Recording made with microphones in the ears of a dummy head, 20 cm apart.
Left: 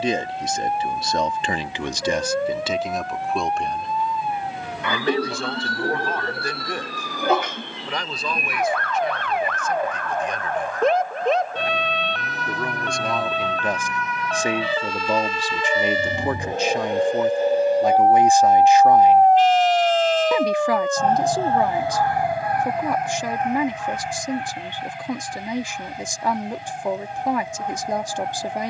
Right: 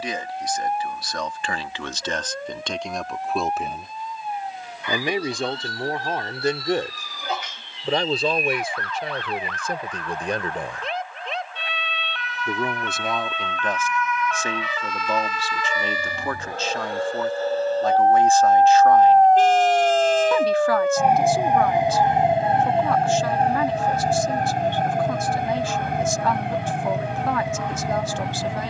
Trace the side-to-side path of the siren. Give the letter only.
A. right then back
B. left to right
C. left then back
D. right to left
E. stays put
B.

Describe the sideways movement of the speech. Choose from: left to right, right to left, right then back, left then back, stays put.
right then back.